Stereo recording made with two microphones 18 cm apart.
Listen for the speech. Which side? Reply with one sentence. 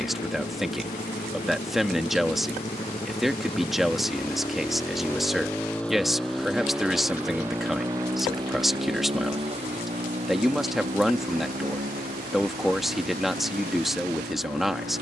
In this clip you hear the speech in the centre.